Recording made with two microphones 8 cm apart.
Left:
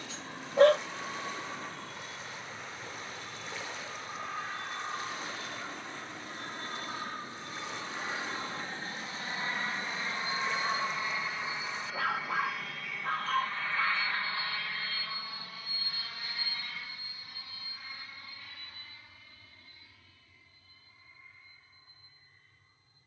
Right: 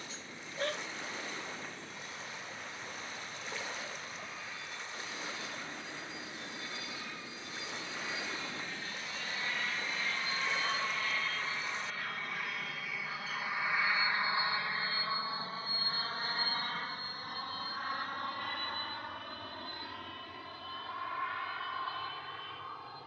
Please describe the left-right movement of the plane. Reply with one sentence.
In this clip you hear the plane move to the right.